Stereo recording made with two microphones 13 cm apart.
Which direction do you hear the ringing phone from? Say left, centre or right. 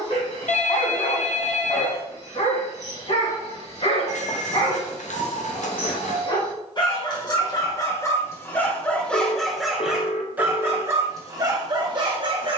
left.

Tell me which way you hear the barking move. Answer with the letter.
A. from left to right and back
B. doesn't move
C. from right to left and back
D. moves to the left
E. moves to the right
E.